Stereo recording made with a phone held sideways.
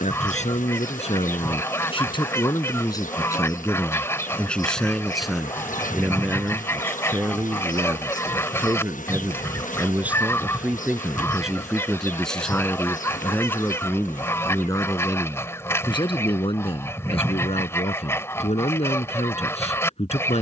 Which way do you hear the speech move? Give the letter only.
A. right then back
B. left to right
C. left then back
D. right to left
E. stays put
A.